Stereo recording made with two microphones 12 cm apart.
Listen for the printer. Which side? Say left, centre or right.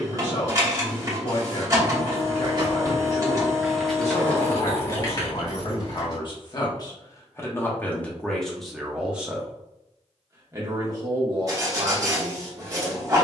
right.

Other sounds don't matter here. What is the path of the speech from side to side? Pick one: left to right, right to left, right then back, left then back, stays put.
left to right.